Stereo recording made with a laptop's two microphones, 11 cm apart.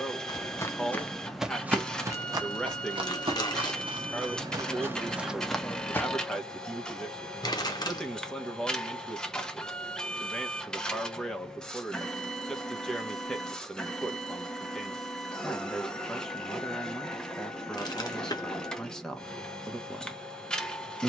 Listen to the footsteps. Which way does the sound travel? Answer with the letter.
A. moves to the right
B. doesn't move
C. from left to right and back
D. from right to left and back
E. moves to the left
C.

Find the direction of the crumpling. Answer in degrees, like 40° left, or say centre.
40° left.